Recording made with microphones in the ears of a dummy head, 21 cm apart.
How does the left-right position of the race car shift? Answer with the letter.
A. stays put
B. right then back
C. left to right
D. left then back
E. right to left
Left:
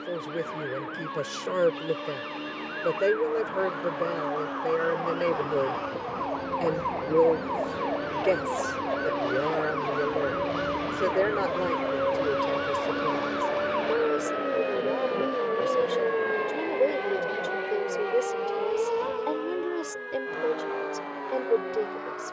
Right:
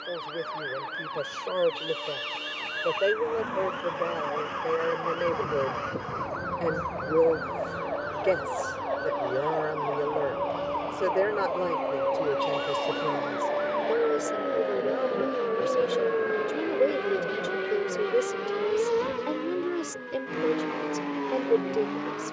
C.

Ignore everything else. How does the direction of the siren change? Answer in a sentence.
You can hear the siren travel towards the left.